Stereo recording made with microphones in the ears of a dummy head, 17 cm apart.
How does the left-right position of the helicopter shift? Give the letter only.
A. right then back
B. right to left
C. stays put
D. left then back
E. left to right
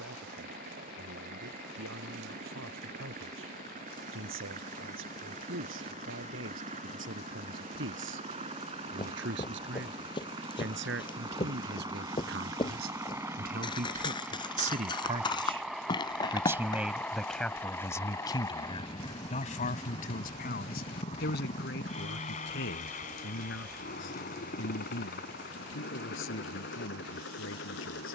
B.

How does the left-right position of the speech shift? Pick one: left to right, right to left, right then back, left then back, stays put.
right to left.